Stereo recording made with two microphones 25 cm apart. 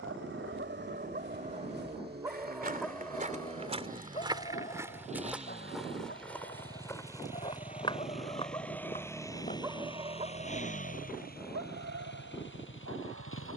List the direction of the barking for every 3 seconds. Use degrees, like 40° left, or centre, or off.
30° right, 30° left, 30° left, 30° right, 70° right.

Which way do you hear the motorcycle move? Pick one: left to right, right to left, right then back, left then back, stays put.
right to left.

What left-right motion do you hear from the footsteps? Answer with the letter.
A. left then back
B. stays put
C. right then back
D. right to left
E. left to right
D.